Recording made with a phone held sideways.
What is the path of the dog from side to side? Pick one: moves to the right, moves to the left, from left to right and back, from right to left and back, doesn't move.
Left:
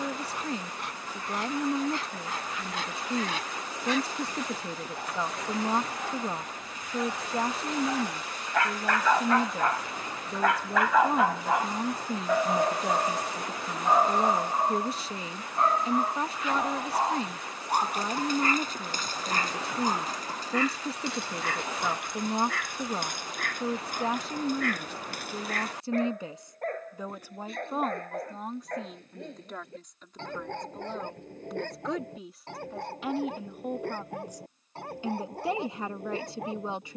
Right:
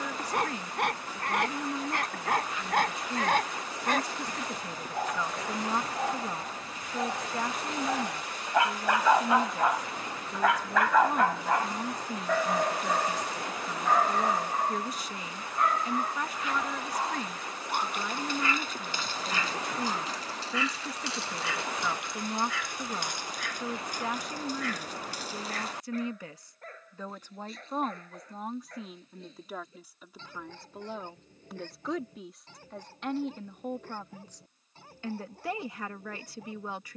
moves to the left.